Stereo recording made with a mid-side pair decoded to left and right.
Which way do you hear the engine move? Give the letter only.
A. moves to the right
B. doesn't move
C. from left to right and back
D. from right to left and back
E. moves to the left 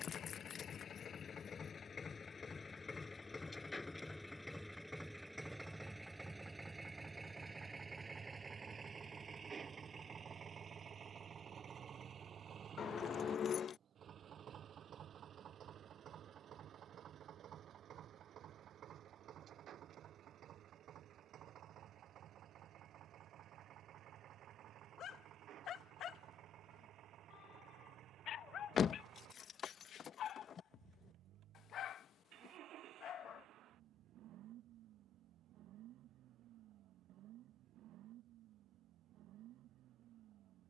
A.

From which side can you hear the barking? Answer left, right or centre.
left.